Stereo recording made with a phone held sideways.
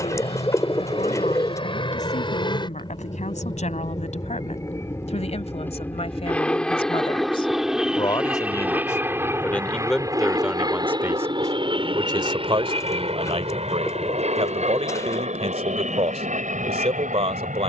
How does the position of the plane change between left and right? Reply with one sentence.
In this clip you hear the plane travel towards the right.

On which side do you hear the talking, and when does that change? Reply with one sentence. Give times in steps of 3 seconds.
You can hear the talking on the left from 0 s, in the centre from 9 s and on the right from 12 s.